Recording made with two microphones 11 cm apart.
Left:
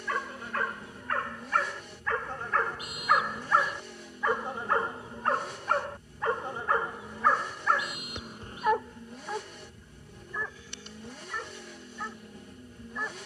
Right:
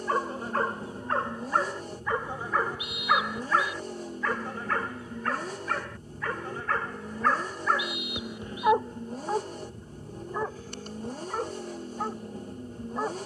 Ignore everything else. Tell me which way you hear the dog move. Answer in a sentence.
In this clip you hear the dog go left and come back.